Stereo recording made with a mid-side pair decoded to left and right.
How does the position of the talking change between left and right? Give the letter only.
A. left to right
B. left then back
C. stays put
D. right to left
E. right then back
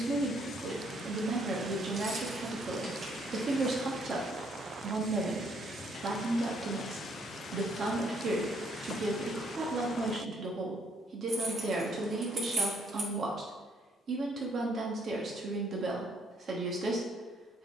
C.